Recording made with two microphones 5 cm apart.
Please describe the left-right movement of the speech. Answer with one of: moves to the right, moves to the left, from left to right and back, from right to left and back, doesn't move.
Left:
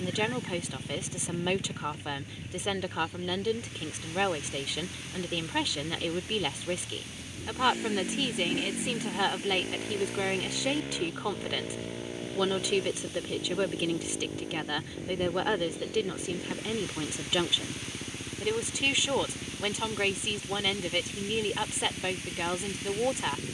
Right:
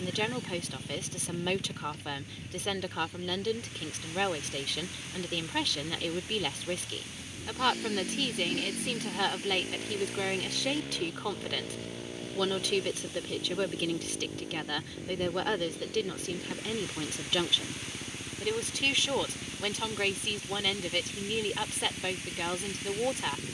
doesn't move.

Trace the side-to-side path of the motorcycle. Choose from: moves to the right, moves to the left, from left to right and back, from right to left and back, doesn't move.
doesn't move.